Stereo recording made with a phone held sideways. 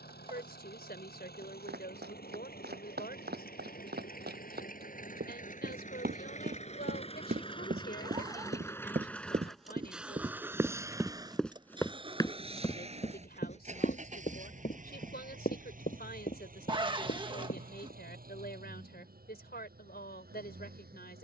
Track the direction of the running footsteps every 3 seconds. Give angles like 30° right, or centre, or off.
80° right, 70° right, 60° right, 20° right, 40° left, 60° left, off.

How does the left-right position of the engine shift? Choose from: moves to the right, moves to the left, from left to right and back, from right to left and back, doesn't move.
moves to the right.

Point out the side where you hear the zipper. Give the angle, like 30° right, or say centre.
30° right.